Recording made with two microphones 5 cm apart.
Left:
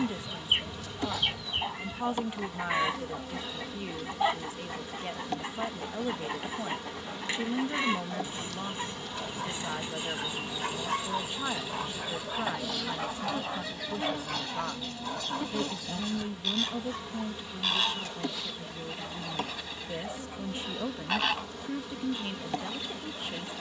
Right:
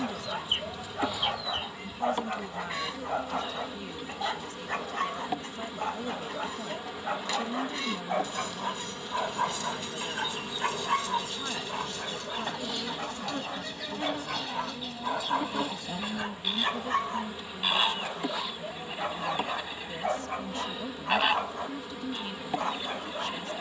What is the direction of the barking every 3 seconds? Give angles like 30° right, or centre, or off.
60° right, 60° right, 60° right, 20° right, centre, 50° right, 50° right, 50° right.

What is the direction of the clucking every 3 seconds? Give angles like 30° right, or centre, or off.
30° left, 30° left, 30° left, 20° left, centre, 10° right, 20° right, 20° right.